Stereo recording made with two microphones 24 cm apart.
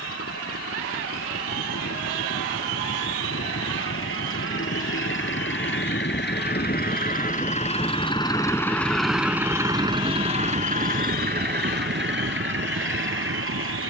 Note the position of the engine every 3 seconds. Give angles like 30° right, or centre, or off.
70° left, 60° left, 30° left, 30° right, 60° right.